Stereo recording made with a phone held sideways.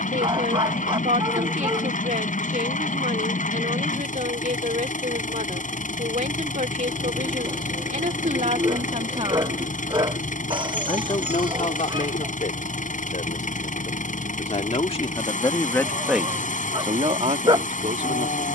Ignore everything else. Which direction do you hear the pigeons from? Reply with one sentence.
You can hear the pigeons on the right.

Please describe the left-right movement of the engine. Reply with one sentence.
In this clip you hear the engine stay in one place.